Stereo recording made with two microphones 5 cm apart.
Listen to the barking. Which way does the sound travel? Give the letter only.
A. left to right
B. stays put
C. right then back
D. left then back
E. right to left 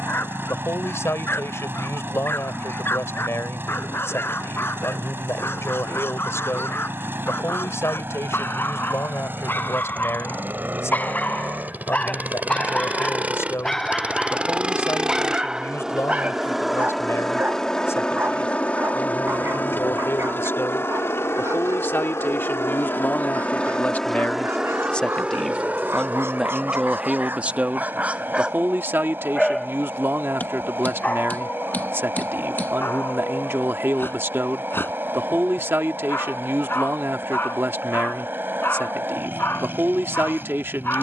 C.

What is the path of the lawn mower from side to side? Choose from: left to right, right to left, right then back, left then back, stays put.
left then back.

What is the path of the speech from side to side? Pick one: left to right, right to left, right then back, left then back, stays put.
left to right.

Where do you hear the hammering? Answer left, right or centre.
left.